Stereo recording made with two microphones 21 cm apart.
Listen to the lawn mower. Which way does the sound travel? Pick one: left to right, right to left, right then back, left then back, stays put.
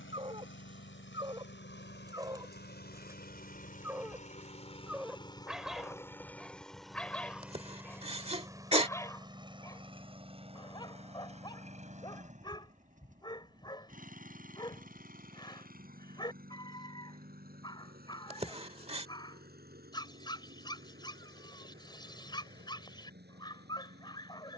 left to right.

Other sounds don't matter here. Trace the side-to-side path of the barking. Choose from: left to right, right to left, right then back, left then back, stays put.
right to left.